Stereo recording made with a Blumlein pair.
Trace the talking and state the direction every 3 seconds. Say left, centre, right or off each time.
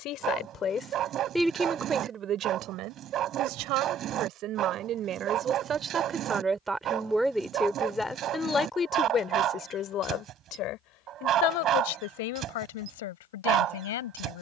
centre, right, centre, left, left.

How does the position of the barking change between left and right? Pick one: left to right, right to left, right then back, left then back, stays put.
stays put.